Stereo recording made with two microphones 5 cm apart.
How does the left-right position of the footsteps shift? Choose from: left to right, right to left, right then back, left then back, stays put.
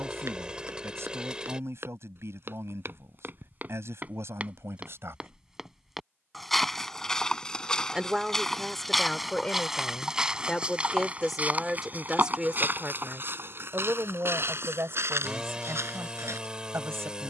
left then back.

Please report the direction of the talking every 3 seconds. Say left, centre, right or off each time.
right, right, centre, centre, right, right.